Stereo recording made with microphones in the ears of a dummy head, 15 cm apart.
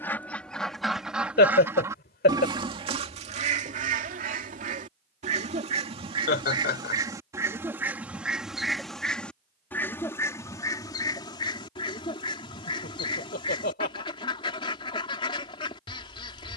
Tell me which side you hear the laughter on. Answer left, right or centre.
left.